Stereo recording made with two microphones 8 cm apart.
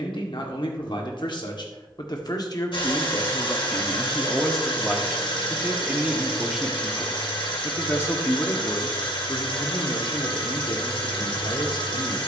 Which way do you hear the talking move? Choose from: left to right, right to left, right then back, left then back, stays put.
right then back.